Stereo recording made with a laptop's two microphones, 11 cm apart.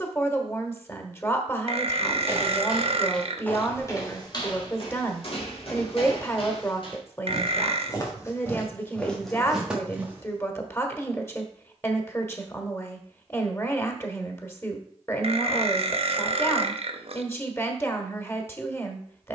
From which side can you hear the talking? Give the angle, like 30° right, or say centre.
20° left.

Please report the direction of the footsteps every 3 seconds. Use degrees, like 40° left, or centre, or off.
10° right, 40° left, 40° left, 10° right, off, off, off.